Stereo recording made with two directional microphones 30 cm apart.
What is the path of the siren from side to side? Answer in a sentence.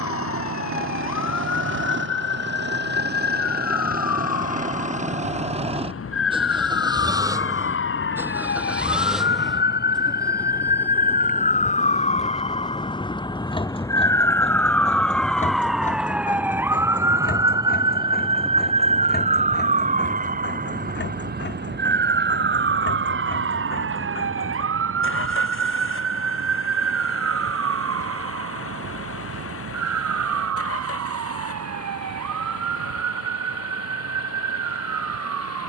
In this clip you hear the siren travel towards the right.